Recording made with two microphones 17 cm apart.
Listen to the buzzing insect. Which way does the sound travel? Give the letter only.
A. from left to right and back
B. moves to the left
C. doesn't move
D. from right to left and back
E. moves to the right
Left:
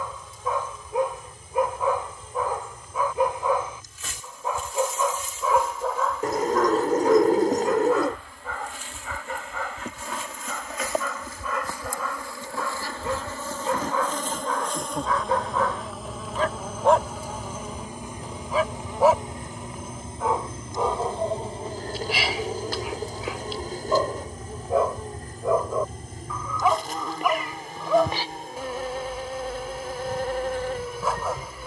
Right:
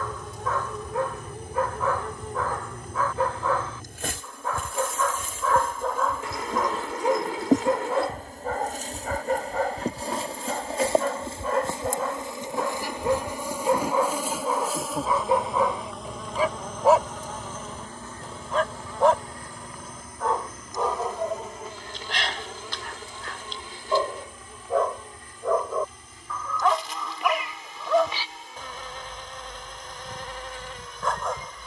B.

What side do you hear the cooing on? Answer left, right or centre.
left.